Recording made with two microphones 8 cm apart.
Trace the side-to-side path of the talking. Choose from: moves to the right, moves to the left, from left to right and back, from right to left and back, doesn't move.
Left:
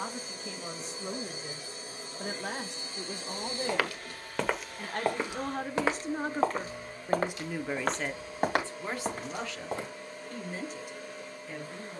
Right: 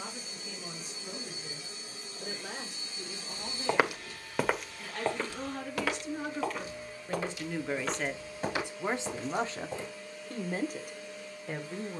moves to the right.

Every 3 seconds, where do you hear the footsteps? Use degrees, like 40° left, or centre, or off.
off, centre, 50° left, 60° left.